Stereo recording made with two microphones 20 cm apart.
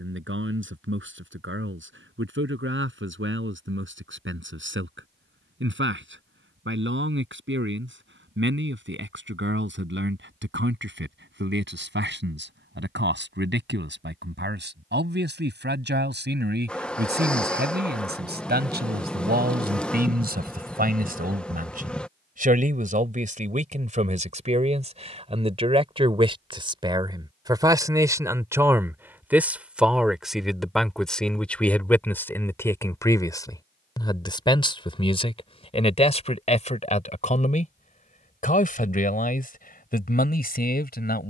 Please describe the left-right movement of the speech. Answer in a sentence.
You can hear the speech travel towards the left.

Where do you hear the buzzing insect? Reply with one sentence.
You can hear the buzzing insect in the centre.